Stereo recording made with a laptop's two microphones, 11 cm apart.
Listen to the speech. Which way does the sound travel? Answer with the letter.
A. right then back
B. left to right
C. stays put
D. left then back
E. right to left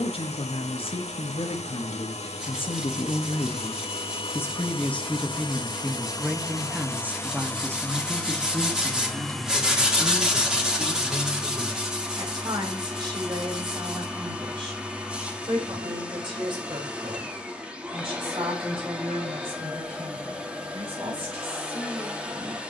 B.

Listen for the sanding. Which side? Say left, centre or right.
centre.